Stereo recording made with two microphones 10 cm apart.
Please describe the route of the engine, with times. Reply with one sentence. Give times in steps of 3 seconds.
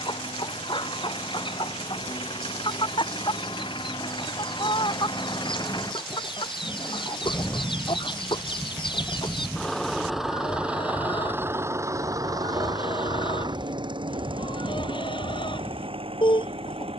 In this clip you hear the engine on the left from 0 s, in the centre from 9 s and on the right from 12 s.